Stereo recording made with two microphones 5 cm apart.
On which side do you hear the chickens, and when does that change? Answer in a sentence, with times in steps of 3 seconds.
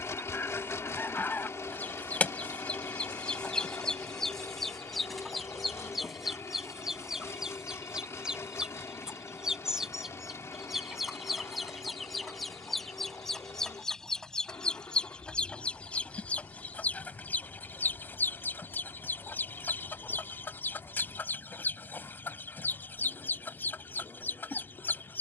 You can hear the chickens on the left from 0 s, in the centre from 3 s and on the left from 15 s.